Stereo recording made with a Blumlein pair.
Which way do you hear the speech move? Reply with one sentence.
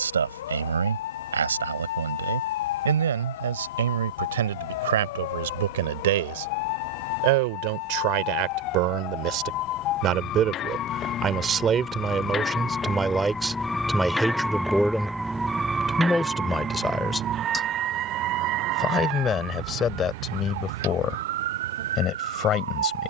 You can hear the speech move to the left.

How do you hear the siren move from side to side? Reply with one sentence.
In this clip you hear the siren move from left to right.